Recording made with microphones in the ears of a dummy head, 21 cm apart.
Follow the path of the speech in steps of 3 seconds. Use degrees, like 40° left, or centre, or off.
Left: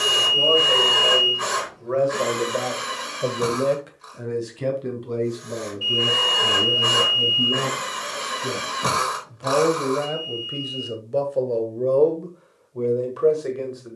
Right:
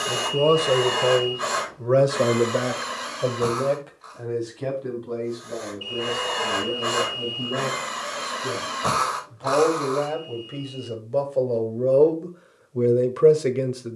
50° right, 30° left, 40° left, 10° left, 30° right.